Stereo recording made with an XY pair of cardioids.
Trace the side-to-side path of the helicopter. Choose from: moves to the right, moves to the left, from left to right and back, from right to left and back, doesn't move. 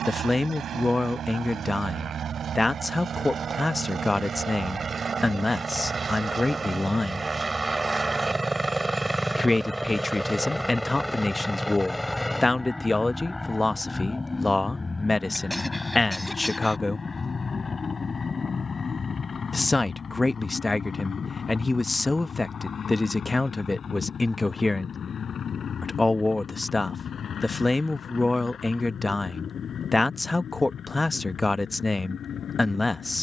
moves to the left.